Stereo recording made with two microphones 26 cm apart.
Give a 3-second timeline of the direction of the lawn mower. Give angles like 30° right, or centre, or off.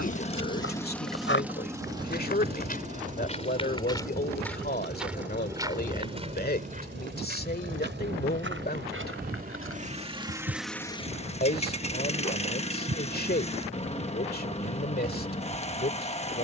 centre, 40° right, 40° right, centre, 20° left, 20° left.